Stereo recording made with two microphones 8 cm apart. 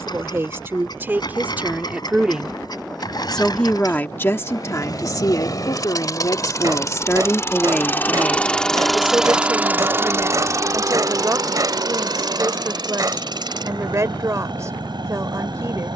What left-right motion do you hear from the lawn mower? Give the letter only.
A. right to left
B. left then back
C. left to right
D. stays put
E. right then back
C.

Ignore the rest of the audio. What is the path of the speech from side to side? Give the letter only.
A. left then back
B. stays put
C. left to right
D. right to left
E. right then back
A.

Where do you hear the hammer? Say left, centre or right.
right.